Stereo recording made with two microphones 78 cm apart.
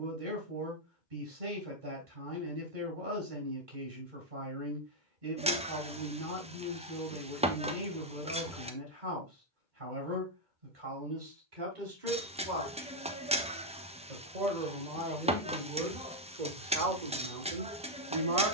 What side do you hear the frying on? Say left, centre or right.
centre.